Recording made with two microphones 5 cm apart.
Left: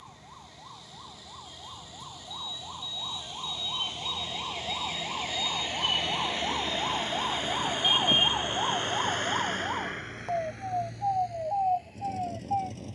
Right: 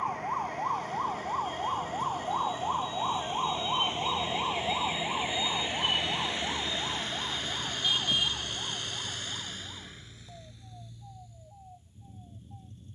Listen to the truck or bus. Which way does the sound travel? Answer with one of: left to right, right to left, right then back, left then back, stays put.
right to left.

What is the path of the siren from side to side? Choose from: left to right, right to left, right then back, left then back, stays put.
right to left.